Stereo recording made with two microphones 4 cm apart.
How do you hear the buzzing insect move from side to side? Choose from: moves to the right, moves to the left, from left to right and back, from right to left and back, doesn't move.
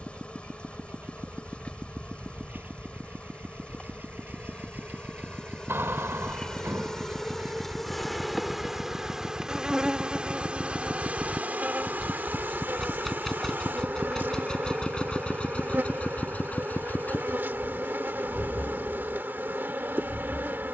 moves to the right.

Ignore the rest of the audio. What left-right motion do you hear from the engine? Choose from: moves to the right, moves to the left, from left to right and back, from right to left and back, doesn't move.
moves to the left.